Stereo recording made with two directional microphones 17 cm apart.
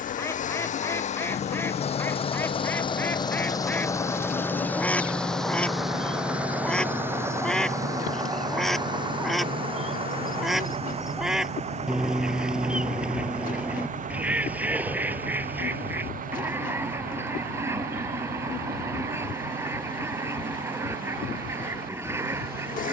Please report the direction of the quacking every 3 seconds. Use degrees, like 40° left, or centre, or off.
10° left, 10° left, centre, centre, 10° right, 10° right, 20° right, 20° right.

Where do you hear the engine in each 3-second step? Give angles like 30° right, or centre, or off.
40° left, 10° left, 20° right, 40° right, 50° right, 50° right, 60° right, 60° right.